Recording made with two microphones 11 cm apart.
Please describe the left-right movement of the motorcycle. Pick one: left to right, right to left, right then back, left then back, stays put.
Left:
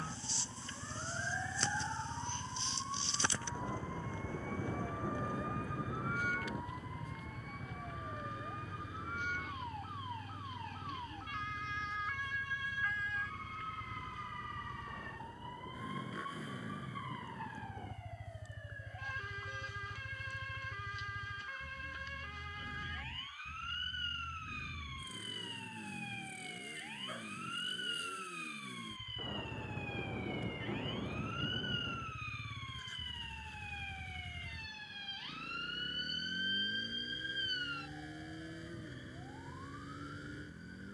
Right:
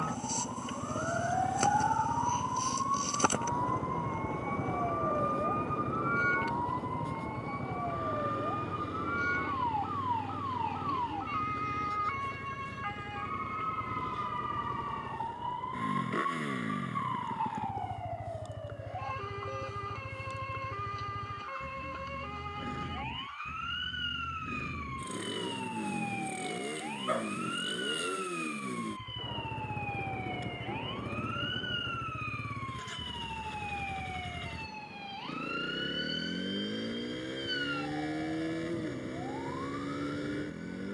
stays put.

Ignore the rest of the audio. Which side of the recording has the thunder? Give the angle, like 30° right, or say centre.
10° right.